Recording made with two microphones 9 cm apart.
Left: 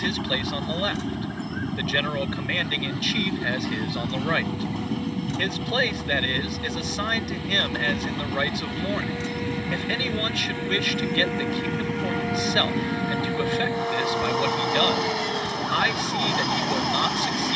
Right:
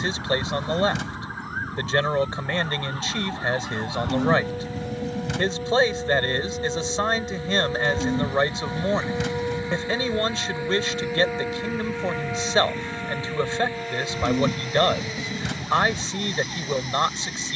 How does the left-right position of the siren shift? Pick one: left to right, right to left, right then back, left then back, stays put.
right to left.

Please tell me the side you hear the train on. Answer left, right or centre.
left.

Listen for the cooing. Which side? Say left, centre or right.
right.